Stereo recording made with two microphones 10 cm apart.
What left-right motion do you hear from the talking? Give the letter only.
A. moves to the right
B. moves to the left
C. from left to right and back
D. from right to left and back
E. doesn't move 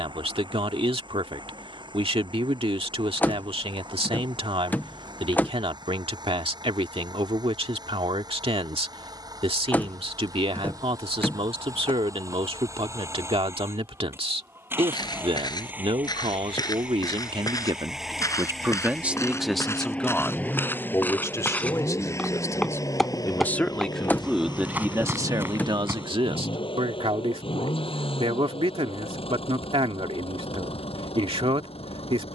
D.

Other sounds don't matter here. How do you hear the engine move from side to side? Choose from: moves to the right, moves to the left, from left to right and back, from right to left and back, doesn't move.
moves to the left.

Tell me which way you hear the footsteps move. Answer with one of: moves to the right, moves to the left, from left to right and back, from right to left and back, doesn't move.
moves to the right.